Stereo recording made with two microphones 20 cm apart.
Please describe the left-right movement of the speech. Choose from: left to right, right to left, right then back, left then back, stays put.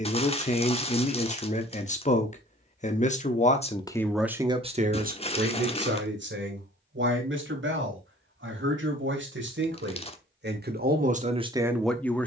right then back.